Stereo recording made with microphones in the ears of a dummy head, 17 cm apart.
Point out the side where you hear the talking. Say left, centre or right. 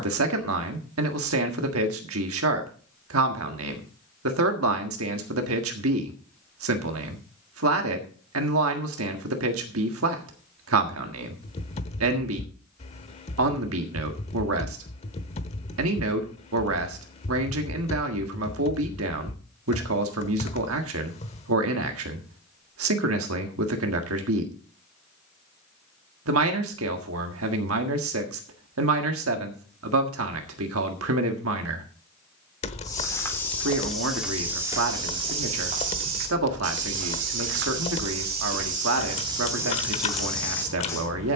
right.